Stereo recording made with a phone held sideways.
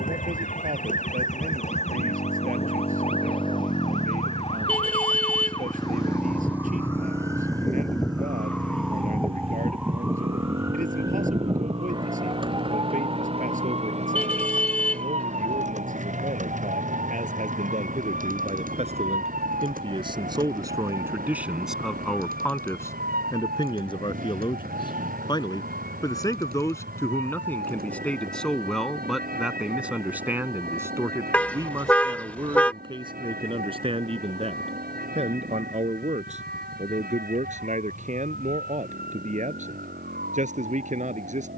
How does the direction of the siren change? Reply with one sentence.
You can hear the siren move to the right.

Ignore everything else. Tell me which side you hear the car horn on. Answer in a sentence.
In this clip you hear the car horn in the centre.